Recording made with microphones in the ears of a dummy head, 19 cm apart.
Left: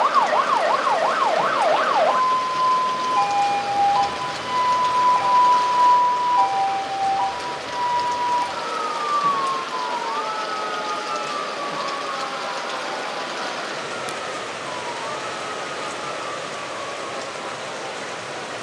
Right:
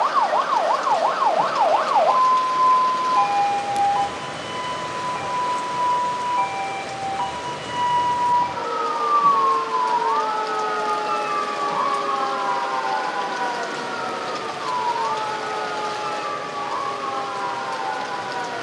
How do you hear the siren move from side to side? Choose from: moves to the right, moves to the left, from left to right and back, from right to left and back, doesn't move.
moves to the right.